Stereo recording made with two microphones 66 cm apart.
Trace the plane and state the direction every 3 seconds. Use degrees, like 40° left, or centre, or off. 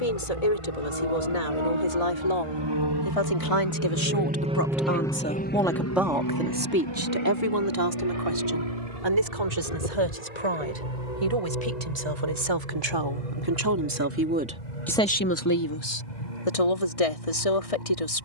60° right, 10° right, 40° left, 60° left, 70° left, 80° left.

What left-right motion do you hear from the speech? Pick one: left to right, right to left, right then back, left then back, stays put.
right then back.